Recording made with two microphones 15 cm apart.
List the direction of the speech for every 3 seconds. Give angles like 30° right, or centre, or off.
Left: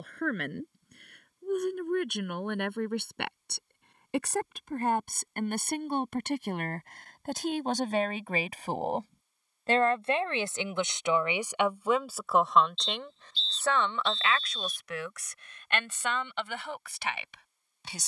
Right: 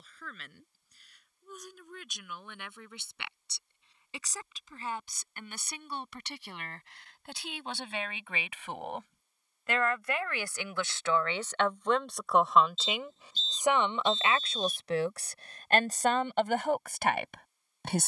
70° left, 60° left, 50° left, 20° left, 10° right, 50° right.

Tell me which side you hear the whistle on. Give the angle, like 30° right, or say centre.
40° right.